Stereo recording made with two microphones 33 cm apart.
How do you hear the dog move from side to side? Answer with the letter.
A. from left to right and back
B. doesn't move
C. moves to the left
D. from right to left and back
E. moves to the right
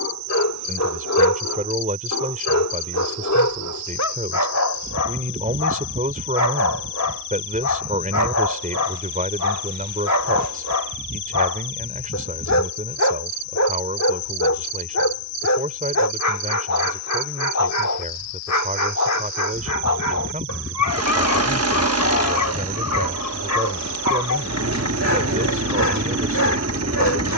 B.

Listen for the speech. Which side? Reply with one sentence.
You can hear the speech on the right.